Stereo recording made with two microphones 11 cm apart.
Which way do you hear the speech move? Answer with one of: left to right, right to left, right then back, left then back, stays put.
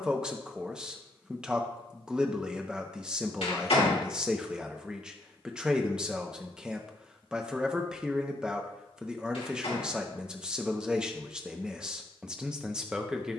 stays put.